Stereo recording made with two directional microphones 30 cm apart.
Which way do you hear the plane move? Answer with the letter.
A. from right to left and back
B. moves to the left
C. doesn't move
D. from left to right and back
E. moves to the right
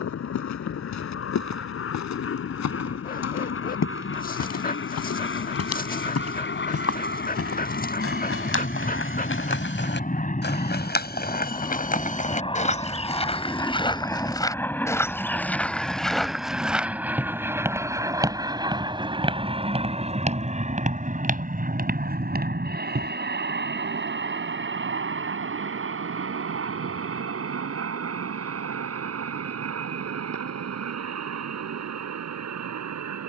E.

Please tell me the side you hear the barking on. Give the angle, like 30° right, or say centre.
30° left.